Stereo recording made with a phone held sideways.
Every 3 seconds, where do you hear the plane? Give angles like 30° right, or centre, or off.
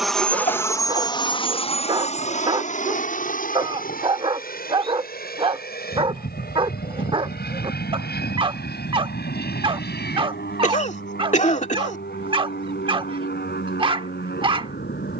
30° left, 60° left, 60° left, 70° left, 70° left.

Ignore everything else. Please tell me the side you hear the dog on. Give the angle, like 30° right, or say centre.
30° right.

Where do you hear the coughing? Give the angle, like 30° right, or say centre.
50° left.